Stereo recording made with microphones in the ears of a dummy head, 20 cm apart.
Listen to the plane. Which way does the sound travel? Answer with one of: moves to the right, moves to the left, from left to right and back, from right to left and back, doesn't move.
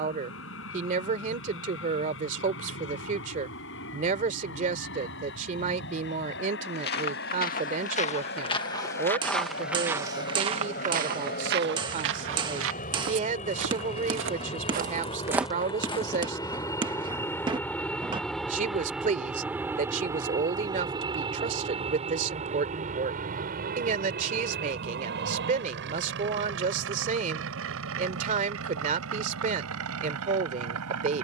moves to the right.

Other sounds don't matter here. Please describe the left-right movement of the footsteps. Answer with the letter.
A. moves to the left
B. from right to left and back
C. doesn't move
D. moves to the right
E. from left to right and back
E.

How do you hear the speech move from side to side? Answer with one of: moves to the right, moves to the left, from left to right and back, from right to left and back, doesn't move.
doesn't move.